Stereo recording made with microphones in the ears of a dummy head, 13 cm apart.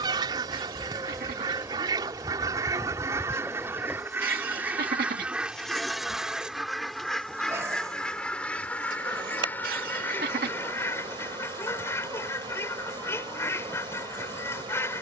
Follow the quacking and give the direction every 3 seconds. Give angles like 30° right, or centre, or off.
30° right, 10° right, centre, 20° left, 20° left.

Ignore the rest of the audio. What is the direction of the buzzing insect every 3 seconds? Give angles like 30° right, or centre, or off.
20° right, centre, 20° right, 30° right, 30° right.